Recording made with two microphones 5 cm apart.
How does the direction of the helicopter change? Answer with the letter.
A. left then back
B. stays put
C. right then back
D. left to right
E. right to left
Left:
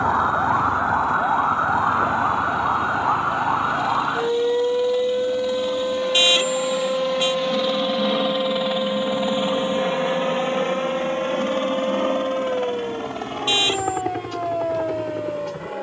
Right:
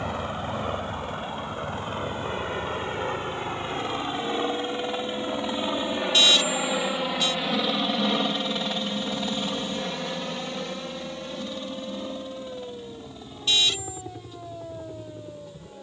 E.